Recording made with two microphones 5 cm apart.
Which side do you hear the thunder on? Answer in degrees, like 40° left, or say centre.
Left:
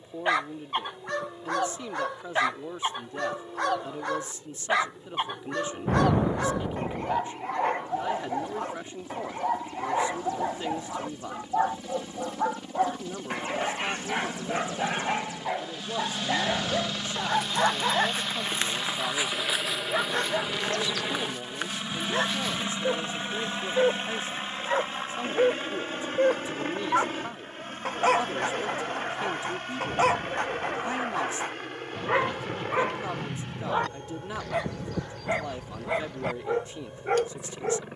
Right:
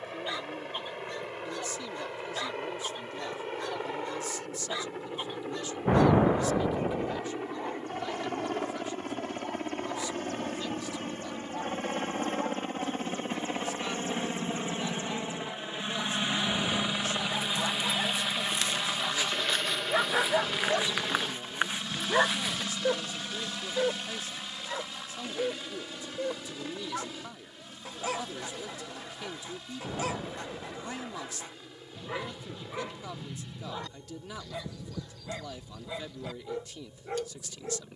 20° right.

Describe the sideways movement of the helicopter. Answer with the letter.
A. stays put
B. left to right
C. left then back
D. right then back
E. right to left
E.